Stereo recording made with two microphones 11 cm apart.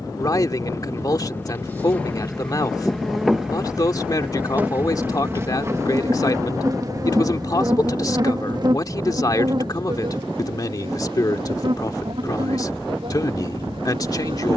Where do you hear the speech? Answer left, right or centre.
left.